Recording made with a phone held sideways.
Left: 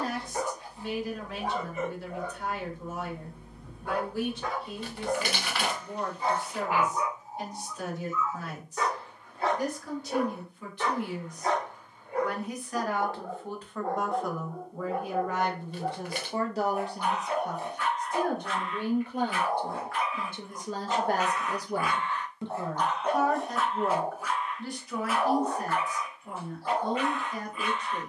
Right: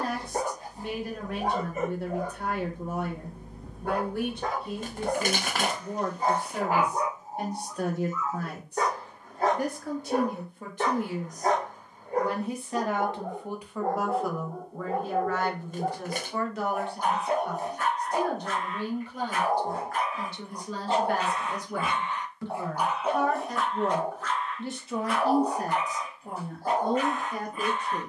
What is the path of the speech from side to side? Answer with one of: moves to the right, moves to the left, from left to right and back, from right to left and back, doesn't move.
from right to left and back.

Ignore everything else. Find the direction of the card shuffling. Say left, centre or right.
right.